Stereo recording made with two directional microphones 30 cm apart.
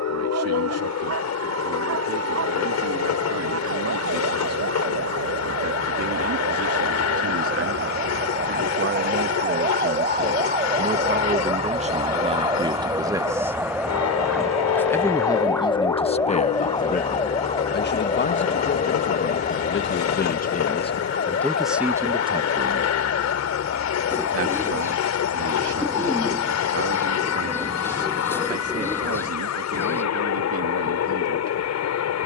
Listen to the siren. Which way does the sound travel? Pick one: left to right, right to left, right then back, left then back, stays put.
right to left.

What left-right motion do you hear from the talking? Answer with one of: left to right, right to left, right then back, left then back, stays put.
left then back.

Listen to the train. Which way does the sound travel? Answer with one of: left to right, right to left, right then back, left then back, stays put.
stays put.